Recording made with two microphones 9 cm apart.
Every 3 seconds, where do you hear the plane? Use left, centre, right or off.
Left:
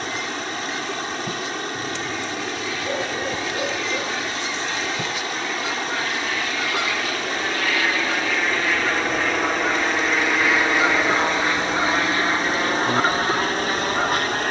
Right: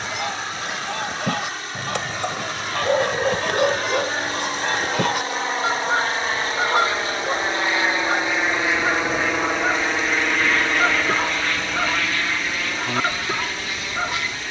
right, right, right, centre, left.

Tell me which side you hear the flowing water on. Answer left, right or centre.
left.